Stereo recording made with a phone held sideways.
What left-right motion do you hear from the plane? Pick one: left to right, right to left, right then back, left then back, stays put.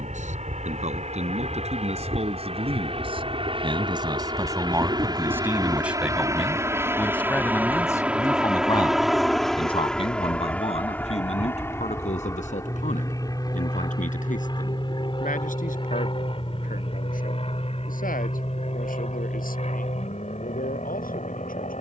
right to left.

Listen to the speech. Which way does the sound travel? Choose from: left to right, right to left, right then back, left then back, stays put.
right to left.